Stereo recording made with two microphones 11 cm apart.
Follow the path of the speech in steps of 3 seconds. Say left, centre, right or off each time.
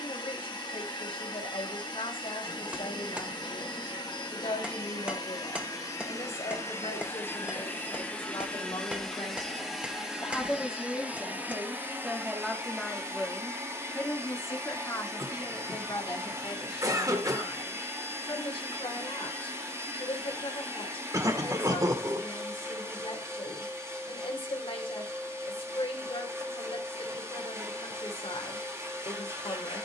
left, left, left, centre, centre, left, left, left, left, left.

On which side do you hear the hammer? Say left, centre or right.
centre.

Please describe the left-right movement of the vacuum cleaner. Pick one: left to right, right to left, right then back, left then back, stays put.
left to right.